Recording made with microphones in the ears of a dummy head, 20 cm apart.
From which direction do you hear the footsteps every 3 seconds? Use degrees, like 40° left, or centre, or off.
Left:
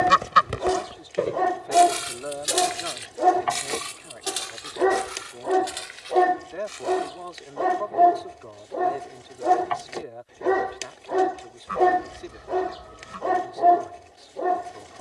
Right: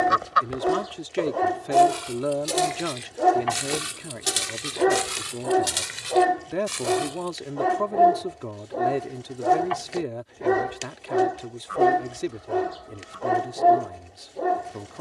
30° left, 40° right, 70° right, off, off.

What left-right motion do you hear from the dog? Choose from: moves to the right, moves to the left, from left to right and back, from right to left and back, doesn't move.
doesn't move.